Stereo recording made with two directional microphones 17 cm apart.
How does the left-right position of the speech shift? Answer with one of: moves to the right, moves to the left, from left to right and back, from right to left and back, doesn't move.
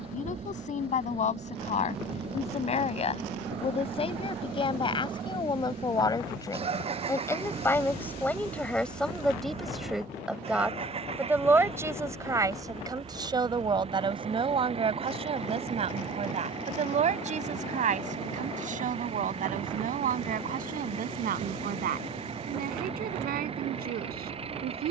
moves to the right.